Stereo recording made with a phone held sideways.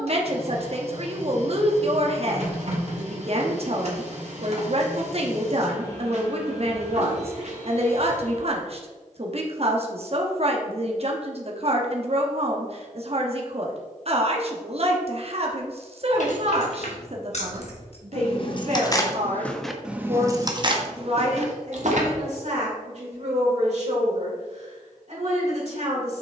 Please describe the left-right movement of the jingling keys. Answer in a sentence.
You can hear the jingling keys move to the right.